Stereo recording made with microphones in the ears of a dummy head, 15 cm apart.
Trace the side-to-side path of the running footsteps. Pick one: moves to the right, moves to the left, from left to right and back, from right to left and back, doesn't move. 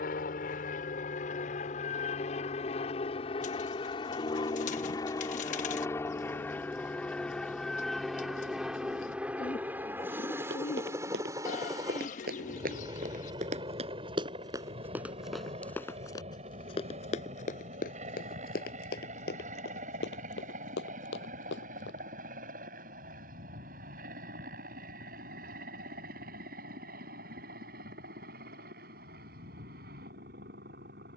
moves to the left.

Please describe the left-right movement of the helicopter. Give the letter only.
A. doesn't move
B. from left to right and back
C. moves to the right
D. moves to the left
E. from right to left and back
C.